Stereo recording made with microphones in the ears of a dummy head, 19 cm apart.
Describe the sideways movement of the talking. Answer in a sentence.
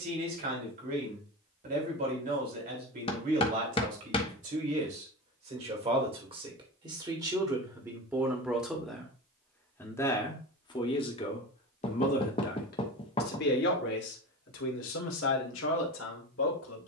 In this clip you hear the talking go from the right side to the left.